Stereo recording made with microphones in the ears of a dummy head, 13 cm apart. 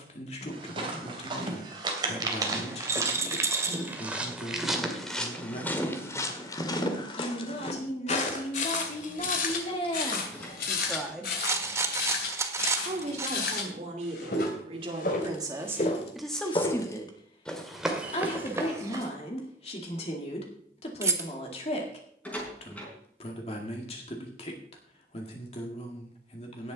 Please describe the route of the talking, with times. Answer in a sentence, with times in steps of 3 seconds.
In this clip you hear the talking on the left from 0 s, on the right from 12 s, in the centre from 15 s and on the left from 18 s.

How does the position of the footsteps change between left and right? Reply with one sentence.
In this clip you hear the footsteps move from right to left and back again.